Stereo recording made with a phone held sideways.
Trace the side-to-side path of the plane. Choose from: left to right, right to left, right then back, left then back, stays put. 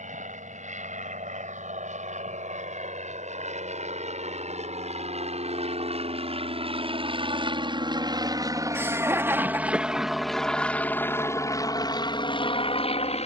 right to left.